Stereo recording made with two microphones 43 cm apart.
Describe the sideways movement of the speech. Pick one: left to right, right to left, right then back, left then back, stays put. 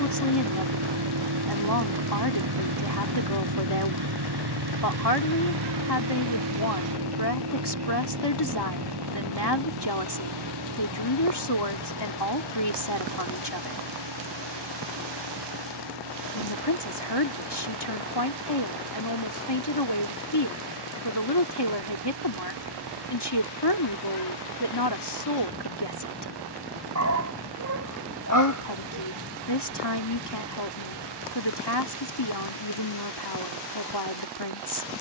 stays put.